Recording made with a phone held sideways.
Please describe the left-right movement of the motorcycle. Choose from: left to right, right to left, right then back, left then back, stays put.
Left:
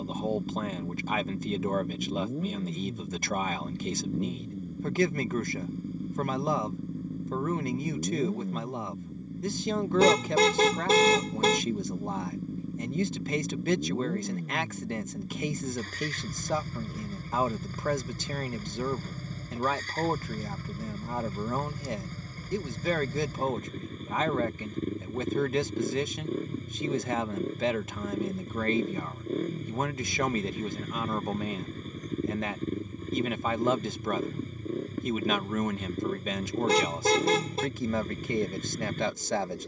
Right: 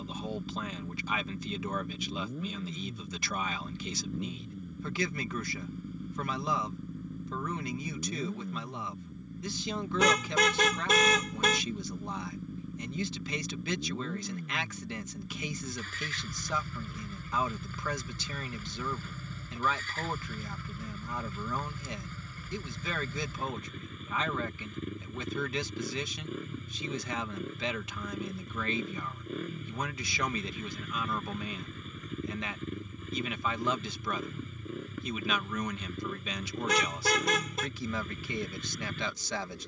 stays put.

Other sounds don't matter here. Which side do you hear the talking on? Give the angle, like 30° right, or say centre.
50° left.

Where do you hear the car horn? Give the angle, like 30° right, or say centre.
30° left.